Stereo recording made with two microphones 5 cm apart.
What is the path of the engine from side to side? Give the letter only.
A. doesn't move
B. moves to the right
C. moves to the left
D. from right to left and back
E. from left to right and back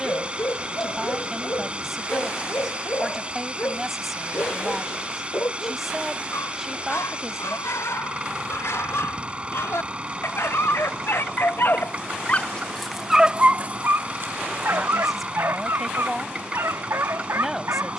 A.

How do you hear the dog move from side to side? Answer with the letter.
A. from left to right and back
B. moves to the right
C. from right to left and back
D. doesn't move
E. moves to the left
B.